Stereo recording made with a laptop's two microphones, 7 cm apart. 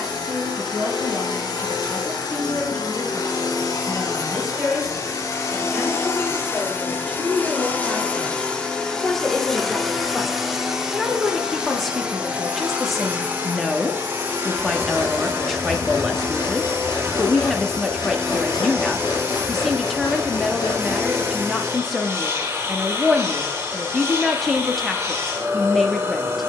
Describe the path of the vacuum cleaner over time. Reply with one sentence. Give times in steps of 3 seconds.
In this clip you hear the vacuum cleaner on the left from 0 s, in the centre from 9 s and on the right from 12 s.